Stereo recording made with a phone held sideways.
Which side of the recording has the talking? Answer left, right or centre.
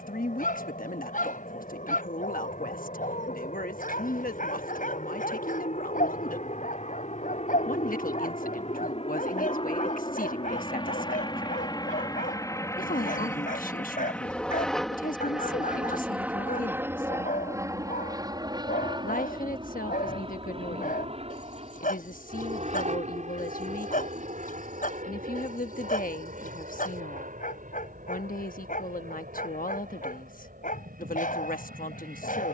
left.